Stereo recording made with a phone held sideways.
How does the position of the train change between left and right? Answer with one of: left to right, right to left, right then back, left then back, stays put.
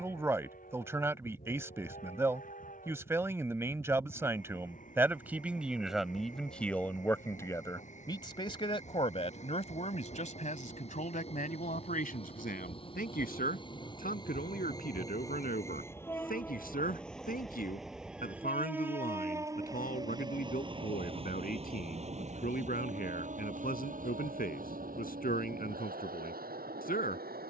left to right.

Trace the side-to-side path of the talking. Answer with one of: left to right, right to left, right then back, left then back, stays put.
right to left.